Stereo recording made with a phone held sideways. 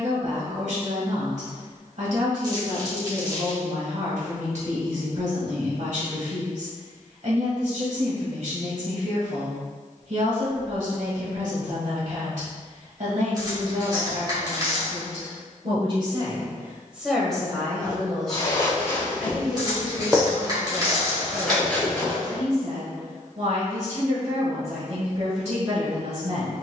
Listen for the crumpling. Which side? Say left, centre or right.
right.